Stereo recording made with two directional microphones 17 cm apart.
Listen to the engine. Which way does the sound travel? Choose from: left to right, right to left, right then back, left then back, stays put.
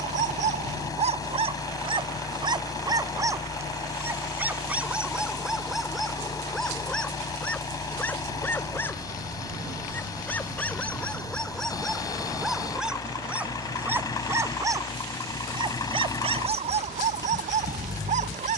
stays put.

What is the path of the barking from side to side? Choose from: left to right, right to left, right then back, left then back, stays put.
left then back.